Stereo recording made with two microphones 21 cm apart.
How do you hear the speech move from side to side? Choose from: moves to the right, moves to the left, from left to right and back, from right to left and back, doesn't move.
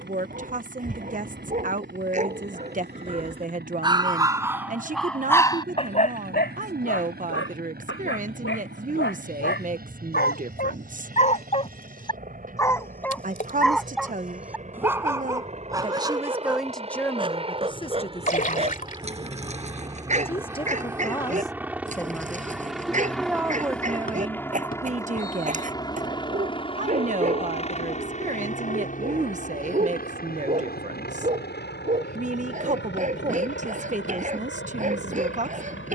from right to left and back.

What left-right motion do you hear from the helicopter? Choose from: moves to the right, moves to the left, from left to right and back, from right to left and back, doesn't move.
moves to the left.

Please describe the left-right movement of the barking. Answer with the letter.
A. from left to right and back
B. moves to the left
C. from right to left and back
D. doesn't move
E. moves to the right
C.